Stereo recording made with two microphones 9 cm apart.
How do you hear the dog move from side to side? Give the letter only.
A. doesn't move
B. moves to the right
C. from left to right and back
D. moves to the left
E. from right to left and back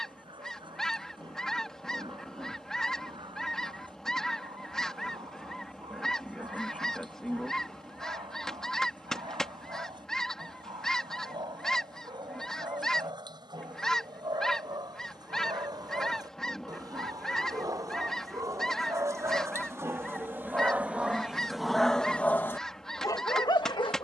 D.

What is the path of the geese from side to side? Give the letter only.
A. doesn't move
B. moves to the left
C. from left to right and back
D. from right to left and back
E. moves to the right
A.